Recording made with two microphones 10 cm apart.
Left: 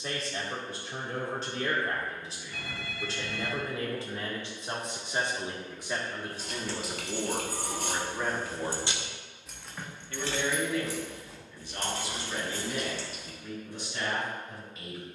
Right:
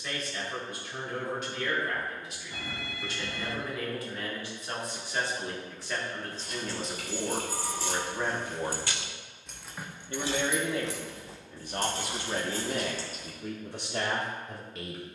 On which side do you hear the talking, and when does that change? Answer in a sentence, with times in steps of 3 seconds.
You can hear the talking on the left from 0 s, in the centre from 6 s and on the right from 9 s.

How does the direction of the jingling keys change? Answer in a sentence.
In this clip you hear the jingling keys go from the left side to the right.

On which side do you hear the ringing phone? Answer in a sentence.
In this clip you hear the ringing phone on the right.